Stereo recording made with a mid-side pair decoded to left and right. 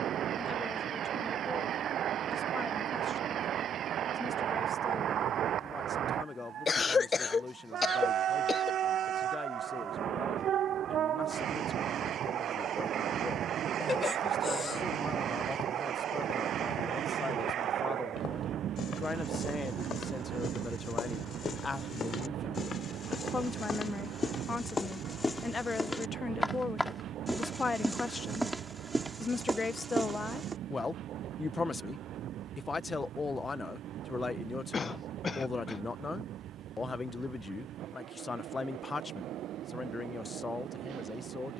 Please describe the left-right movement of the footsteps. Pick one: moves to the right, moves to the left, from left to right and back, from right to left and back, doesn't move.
moves to the right.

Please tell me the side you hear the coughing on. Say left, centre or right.
left.